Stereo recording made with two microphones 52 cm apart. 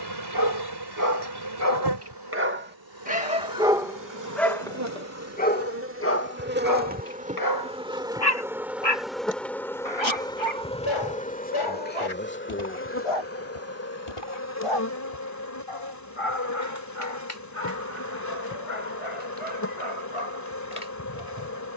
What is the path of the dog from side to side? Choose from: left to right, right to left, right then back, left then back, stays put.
right to left.